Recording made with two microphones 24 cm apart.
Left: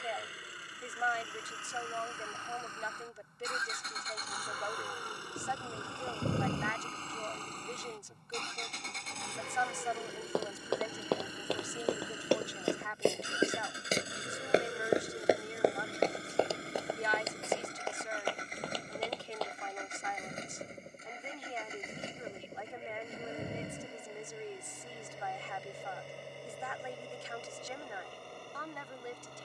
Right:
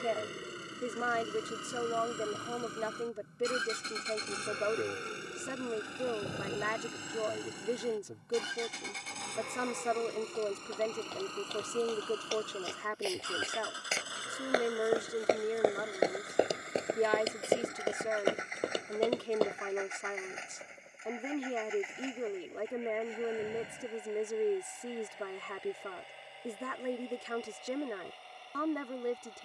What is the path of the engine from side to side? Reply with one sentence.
In this clip you hear the engine travel towards the left.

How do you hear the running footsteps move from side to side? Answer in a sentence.
You can hear the running footsteps move to the right.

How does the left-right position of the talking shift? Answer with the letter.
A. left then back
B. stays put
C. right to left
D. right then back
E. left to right
B.